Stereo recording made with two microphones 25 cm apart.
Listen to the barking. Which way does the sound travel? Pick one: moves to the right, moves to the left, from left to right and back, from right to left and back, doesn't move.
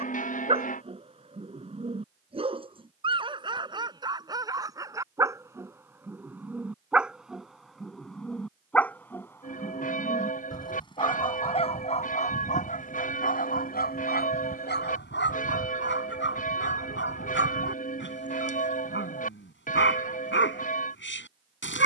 moves to the left.